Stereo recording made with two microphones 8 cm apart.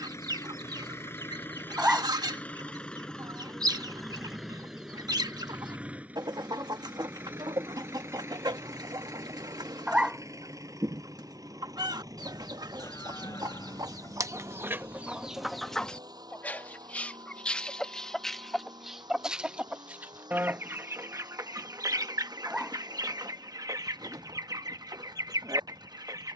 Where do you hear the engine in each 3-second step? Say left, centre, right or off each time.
left, centre, right, right, right, right, right, right, right.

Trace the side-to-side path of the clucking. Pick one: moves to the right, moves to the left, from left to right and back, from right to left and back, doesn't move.
from right to left and back.